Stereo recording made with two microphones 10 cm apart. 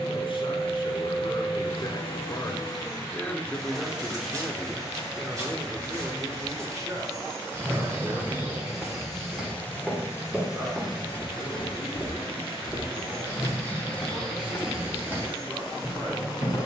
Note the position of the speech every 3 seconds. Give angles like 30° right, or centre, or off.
40° left, 10° right, 40° right, 50° right, 60° right, 60° right.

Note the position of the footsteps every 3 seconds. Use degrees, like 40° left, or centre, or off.
off, 30° right, 20° right, centre, 10° left, 30° right.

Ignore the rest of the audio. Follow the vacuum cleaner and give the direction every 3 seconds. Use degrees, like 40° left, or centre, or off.
60° left, 20° right, 20° right, 30° left, 60° left, 60° left.